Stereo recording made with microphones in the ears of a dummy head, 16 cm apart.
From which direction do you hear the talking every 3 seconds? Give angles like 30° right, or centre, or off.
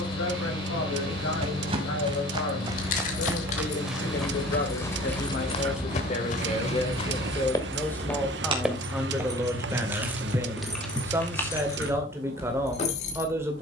80° left, 60° left, 20° left, 10° right, 10° right.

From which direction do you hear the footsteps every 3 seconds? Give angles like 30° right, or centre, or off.
30° right, 10° left, 30° left, 20° right, off.